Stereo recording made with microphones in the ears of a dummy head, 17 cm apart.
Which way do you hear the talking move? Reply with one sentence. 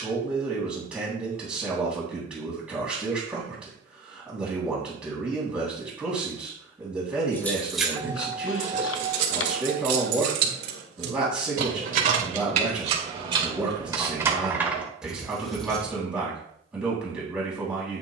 In this clip you hear the talking stay in one place.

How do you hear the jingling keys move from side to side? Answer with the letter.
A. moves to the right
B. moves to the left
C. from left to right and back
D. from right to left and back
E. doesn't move
C.